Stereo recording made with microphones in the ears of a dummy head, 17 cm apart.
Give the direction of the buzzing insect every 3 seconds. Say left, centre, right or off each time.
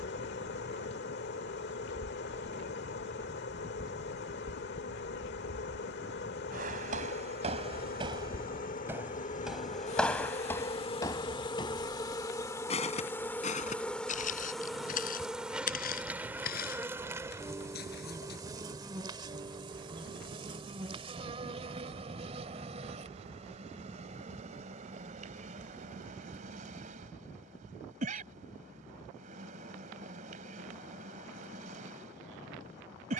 left, left, left, left, centre, centre, right, right, right, right, right.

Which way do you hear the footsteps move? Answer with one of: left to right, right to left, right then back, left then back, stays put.
right to left.